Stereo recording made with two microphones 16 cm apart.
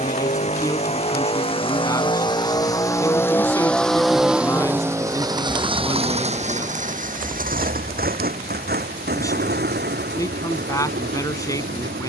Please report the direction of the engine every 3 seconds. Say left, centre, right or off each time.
left, centre, right, right.